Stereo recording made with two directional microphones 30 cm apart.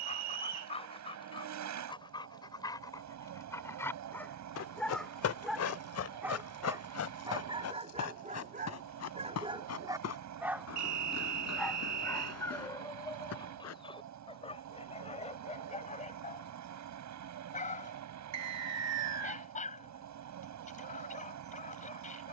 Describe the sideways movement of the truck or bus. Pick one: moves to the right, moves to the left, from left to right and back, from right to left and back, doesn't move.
doesn't move.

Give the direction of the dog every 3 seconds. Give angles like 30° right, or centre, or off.
20° left, 10° left, 20° right, 10° right, 10° left, 20° left, 20° left, 20° left.